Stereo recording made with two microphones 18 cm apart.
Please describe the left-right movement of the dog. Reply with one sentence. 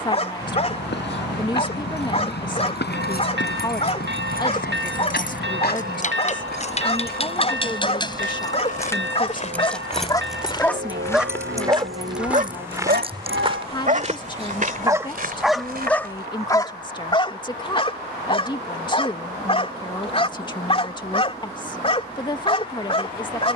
In this clip you hear the dog go right and come back.